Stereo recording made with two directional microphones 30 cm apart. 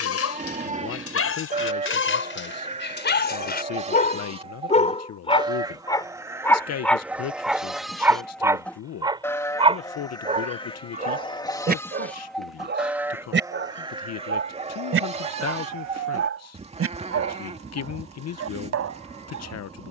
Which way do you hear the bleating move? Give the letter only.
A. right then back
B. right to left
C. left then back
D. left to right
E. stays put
C.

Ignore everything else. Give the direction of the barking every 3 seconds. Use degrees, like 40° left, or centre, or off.
50° left, 30° left, centre, 20° right, 40° right, 50° right, 50° right.